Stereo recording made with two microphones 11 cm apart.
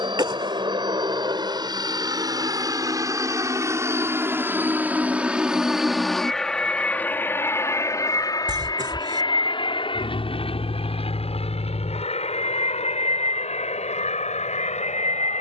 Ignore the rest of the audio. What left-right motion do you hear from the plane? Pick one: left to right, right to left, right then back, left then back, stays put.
right to left.